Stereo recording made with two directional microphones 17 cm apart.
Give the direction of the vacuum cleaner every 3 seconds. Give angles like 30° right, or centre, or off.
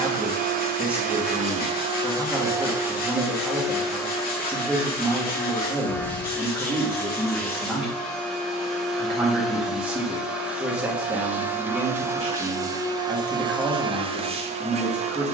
40° right, centre, centre, 10° right, 30° right.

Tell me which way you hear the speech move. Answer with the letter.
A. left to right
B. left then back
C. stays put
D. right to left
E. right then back
C.